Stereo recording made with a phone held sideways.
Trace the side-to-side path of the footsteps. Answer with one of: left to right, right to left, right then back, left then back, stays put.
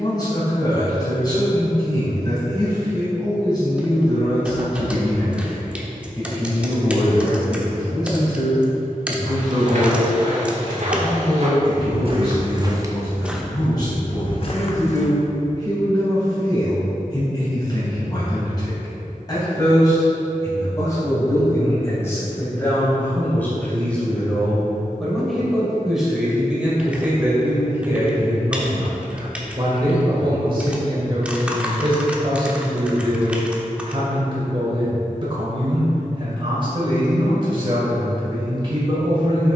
right to left.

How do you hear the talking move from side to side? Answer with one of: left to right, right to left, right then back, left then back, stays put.
left to right.